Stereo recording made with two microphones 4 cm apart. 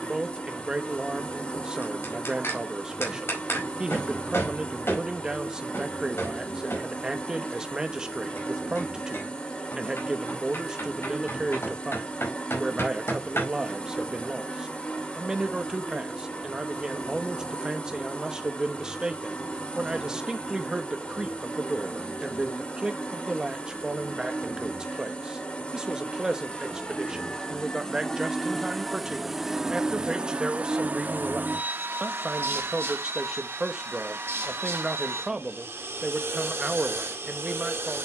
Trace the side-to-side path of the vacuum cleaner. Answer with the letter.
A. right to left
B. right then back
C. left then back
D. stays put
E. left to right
E.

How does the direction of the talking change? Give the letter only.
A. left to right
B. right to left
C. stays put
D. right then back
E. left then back
C.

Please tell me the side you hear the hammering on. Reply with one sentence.
You can hear the hammering on the left.